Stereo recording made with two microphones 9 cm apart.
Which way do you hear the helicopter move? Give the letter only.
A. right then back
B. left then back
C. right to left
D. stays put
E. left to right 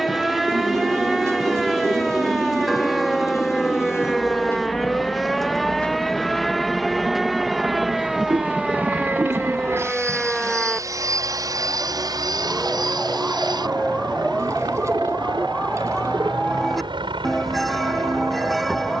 E.